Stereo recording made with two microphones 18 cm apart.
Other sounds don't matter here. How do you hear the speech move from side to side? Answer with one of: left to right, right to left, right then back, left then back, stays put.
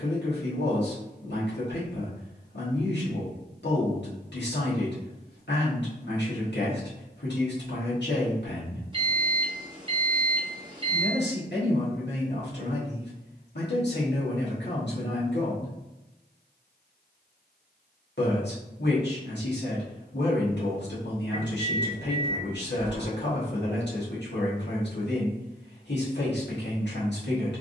stays put.